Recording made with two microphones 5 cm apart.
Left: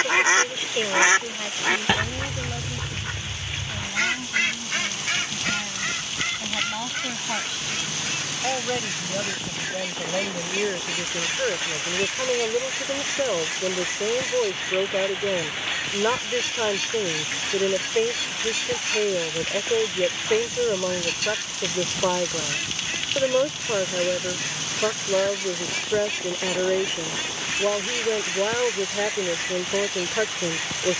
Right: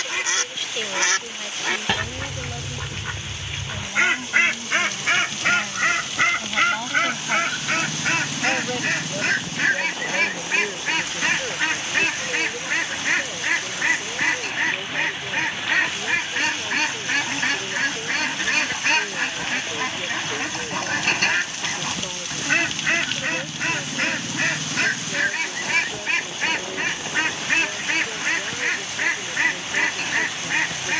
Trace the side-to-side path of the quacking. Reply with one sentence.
You can hear the quacking go from the left side to the right.